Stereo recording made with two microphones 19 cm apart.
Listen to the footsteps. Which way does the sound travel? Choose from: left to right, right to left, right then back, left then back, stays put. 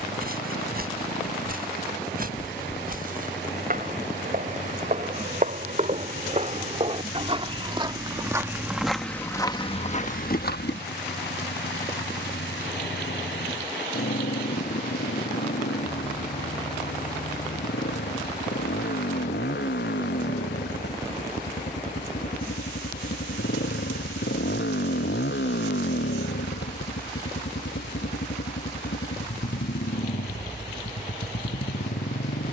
right to left.